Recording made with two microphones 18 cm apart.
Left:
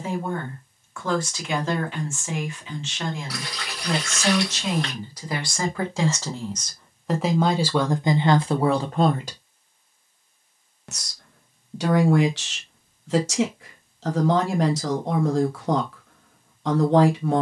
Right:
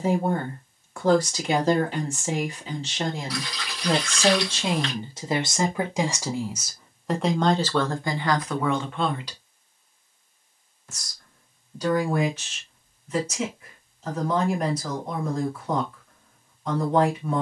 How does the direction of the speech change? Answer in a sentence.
You can hear the speech go from the right side to the left.